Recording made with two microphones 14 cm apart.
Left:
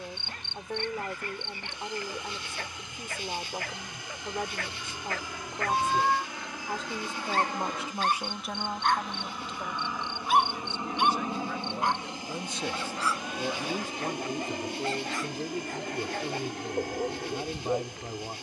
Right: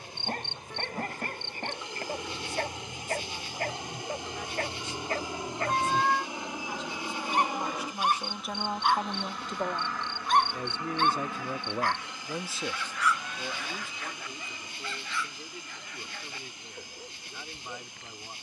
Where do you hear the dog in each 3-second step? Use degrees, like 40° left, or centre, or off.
50° right, 40° right, 20° right, 10° left, 30° left, 50° left.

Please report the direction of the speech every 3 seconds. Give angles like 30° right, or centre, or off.
60° left, 60° left, 20° left, 50° right, 30° left, 50° left.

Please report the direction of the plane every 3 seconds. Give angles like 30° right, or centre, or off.
40° right, 30° right, 10° right, 20° left, 40° left, 60° left.